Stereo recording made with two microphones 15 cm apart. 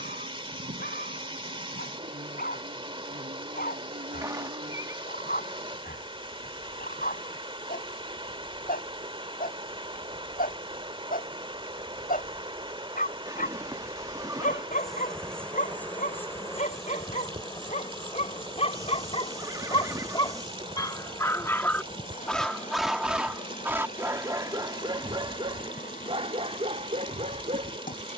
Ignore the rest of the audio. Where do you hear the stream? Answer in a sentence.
You can hear the stream on the right.